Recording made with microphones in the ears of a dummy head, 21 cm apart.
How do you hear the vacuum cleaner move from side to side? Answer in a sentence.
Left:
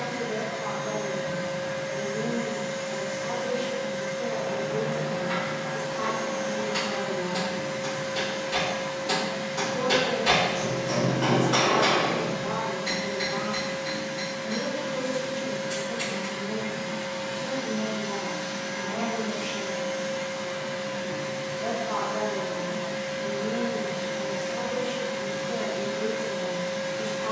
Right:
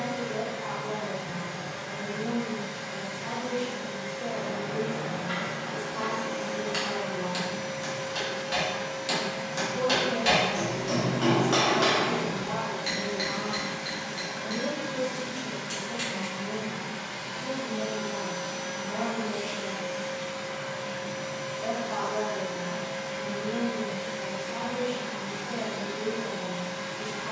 You can hear the vacuum cleaner go right and come back.